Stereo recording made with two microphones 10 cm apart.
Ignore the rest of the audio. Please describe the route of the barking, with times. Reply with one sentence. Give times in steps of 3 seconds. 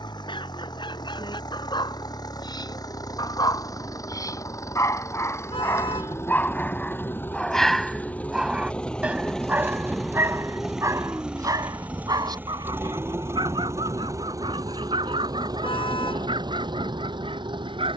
In this clip you hear the barking on the left from 0 s, in the centre from 6 s and on the right from 9 s.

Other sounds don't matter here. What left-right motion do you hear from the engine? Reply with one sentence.
In this clip you hear the engine go from the left side to the right.